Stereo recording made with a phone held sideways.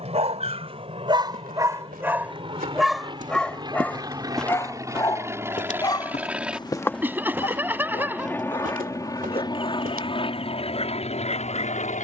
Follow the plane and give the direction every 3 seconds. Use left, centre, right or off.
right, right, centre, left.